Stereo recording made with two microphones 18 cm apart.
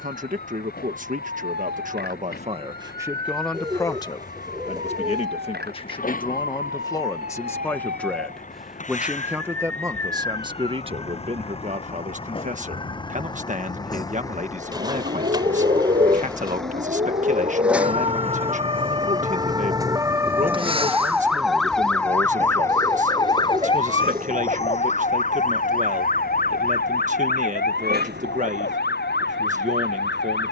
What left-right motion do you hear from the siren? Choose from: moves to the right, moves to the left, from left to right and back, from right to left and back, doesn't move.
moves to the left.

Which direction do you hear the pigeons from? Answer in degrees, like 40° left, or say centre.
20° right.